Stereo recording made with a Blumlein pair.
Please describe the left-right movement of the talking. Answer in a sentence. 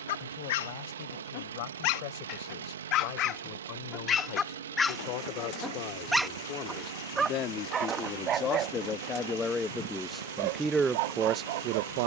You can hear the talking go from the left side to the right.